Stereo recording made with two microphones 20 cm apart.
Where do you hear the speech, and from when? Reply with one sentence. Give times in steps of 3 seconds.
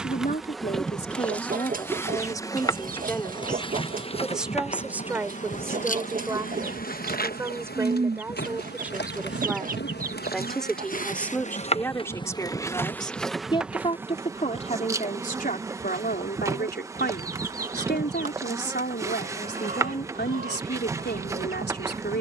You can hear the speech on the left from 0 s, in the centre from 3 s and on the left from 12 s.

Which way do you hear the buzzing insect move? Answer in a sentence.
You can hear the buzzing insect move from right to left and back again.